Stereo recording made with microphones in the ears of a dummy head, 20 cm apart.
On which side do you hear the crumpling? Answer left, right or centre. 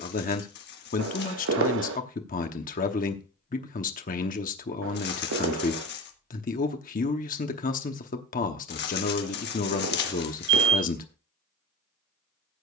left.